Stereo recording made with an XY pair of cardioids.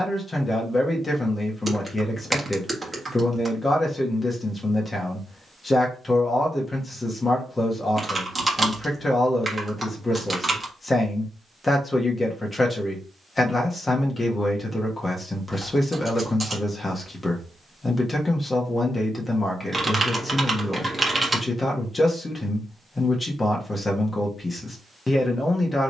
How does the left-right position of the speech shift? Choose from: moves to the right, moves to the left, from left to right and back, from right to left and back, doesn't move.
doesn't move.